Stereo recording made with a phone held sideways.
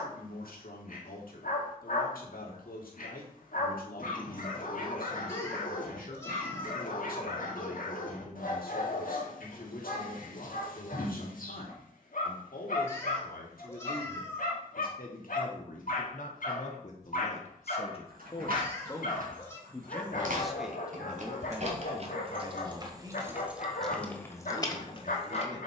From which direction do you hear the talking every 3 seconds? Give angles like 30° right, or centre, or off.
70° left, 70° left, 70° left, 70° left, 70° left, 50° left, 10° left, 20° right, 30° right.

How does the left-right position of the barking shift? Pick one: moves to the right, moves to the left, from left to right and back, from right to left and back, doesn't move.
doesn't move.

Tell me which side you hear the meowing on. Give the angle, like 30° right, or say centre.
20° left.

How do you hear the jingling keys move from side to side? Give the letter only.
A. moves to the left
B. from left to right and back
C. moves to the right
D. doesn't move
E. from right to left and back
A.